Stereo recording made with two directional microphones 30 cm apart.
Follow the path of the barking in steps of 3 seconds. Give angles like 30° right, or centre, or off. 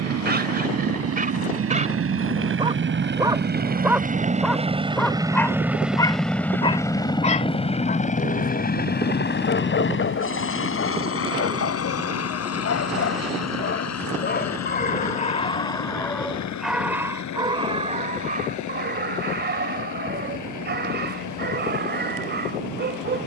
30° right, centre, 20° left, 40° left, 40° left, centre, 30° right, 30° right.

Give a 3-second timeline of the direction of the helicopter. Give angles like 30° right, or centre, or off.
50° right, 20° right, 20° left, 40° left, 50° left, 60° left, 60° left, 70° left.